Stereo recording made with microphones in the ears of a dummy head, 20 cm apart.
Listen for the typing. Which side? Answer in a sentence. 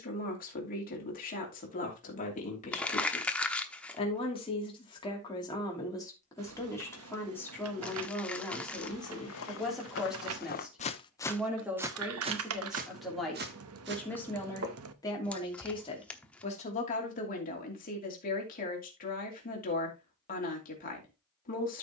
You can hear the typing on the right.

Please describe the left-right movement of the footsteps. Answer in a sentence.
You can hear the footsteps move to the right.